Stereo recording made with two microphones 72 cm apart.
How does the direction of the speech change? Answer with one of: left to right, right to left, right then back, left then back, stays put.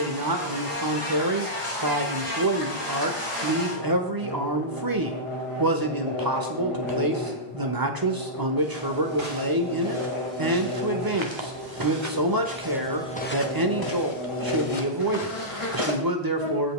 stays put.